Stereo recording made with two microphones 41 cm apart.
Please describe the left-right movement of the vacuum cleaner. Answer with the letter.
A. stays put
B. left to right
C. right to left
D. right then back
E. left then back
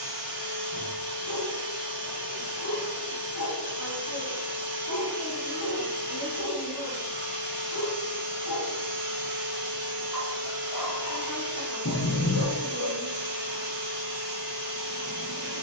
A.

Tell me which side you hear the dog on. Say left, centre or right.
left.